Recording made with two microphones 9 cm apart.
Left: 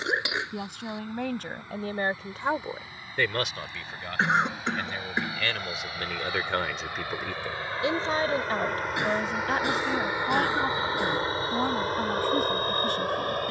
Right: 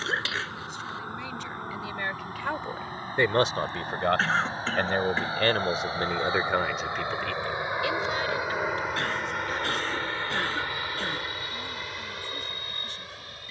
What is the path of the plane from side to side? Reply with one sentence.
You can hear the plane travel towards the left.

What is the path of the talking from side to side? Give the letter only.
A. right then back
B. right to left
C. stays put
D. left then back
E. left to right
A.